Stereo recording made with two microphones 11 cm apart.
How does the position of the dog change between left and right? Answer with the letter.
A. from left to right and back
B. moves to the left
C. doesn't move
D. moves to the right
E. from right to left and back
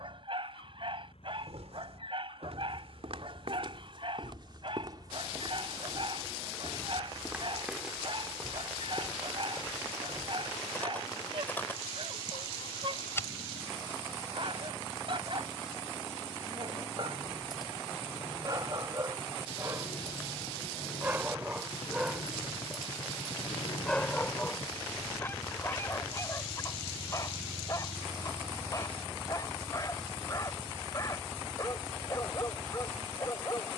B.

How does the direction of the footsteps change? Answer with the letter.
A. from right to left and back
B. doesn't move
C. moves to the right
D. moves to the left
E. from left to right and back
D.